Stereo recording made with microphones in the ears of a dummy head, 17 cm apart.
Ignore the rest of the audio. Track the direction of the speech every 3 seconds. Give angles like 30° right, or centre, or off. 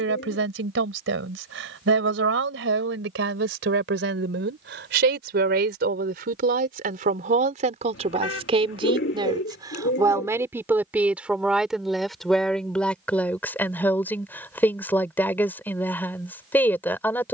80° right, 70° right, 40° right, 10° right, 10° left, 10° left.